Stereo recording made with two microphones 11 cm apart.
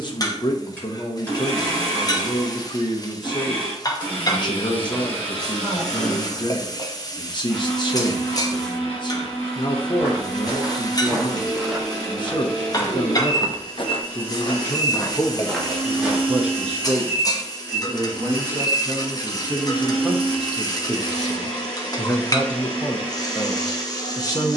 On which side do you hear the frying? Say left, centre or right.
left.